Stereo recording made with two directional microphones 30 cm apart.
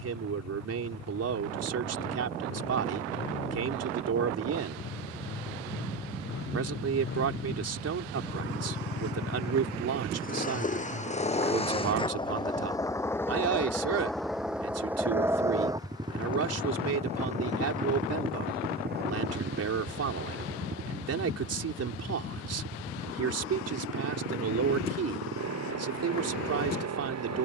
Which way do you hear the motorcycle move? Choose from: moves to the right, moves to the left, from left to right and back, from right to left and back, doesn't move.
moves to the right.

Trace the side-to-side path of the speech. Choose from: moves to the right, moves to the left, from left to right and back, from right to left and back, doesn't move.
doesn't move.